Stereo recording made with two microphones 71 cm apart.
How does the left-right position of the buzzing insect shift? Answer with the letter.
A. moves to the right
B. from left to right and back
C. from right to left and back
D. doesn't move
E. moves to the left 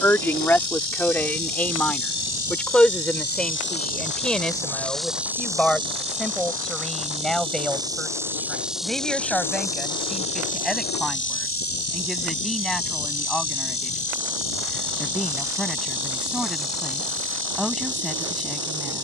B.